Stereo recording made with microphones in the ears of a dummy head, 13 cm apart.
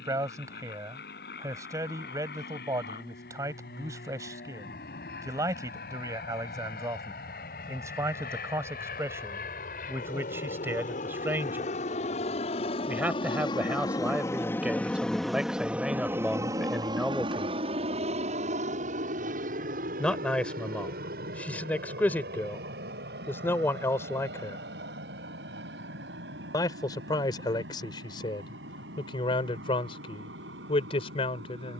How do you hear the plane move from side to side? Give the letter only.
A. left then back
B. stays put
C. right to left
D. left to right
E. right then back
D.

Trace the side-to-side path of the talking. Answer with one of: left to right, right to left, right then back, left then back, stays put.
right to left.